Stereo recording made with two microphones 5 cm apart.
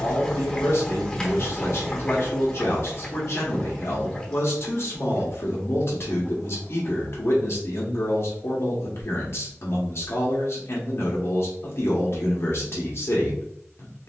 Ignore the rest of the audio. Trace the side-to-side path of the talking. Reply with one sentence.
In this clip you hear the talking stay in one place.